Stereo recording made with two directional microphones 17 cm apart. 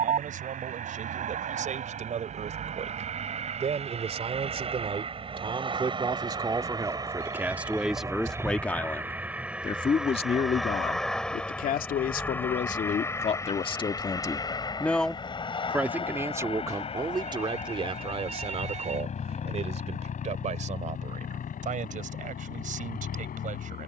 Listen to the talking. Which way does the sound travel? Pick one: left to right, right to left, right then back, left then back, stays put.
left then back.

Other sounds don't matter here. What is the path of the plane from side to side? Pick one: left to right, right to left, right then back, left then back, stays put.
right to left.